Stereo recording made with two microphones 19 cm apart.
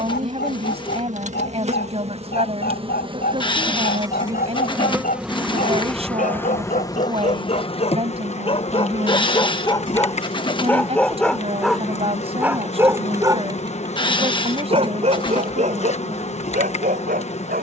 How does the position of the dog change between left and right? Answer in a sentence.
You can hear the dog go from the left side to the right.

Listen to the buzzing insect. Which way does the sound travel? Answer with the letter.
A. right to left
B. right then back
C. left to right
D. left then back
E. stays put
A.